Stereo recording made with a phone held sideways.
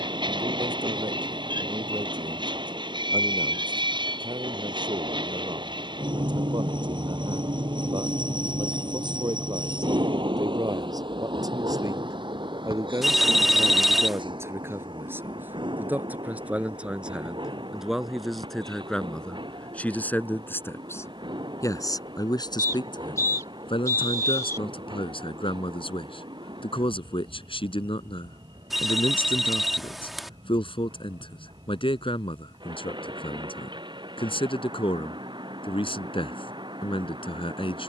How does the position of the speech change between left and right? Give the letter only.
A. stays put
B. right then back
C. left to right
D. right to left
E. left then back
D.